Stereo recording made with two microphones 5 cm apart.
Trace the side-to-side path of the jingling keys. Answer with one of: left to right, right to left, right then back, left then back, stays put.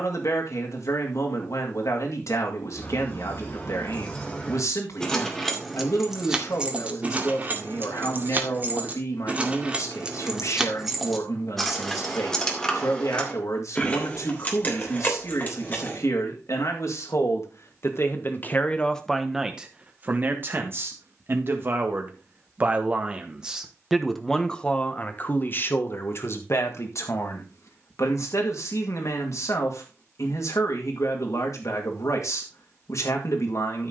right then back.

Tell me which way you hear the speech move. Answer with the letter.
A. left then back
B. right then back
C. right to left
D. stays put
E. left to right
B.